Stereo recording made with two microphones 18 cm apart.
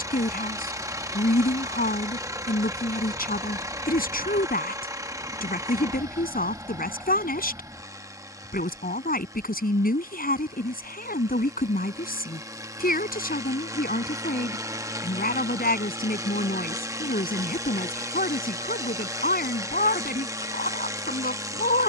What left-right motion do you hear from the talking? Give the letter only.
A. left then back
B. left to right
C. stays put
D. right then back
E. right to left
C.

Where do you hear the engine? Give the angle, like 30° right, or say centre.
20° right.